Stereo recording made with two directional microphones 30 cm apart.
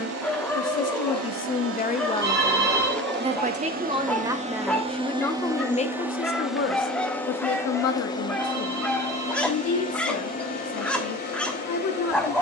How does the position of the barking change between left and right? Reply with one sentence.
In this clip you hear the barking stay put.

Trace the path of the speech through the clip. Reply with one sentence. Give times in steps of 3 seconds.
You can hear the speech on the left from 0 s, in the centre from 3 s and on the left from 6 s.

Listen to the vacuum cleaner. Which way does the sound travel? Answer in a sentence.
You can hear the vacuum cleaner move to the left.